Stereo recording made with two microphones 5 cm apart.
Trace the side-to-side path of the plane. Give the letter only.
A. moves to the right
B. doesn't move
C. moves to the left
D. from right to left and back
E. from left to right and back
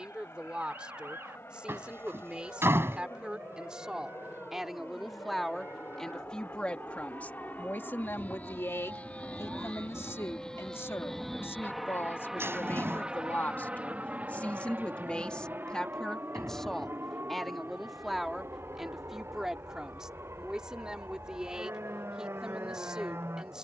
A.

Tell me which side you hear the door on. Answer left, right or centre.
right.